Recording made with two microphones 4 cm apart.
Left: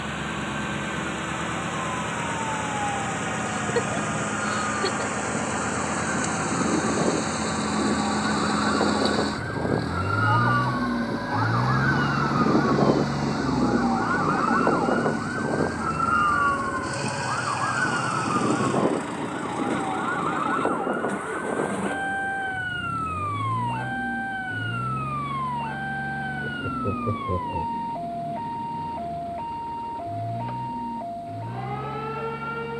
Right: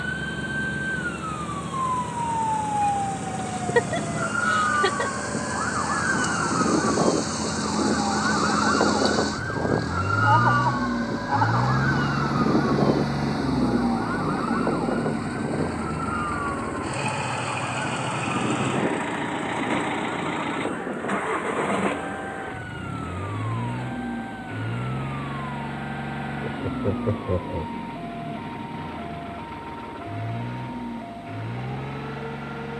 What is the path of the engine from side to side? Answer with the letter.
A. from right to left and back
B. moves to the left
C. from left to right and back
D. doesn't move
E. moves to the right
E.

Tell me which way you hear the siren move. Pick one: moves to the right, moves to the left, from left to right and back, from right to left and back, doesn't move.
moves to the left.